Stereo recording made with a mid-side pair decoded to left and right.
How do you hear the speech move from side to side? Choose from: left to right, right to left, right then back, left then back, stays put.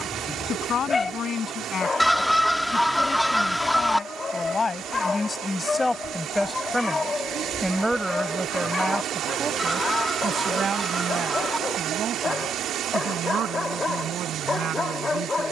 left to right.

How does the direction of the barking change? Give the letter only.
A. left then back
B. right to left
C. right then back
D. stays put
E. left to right
D.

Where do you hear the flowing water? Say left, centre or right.
right.